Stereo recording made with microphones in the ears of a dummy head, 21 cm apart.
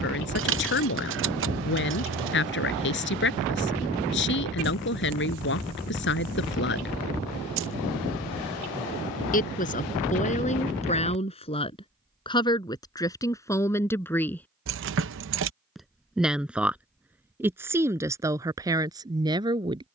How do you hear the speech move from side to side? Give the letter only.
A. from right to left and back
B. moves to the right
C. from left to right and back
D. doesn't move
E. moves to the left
B.